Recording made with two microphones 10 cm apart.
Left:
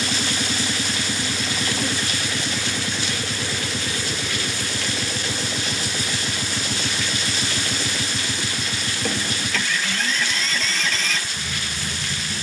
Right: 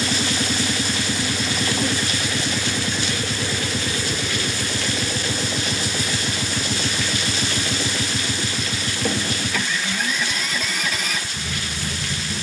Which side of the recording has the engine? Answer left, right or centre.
centre.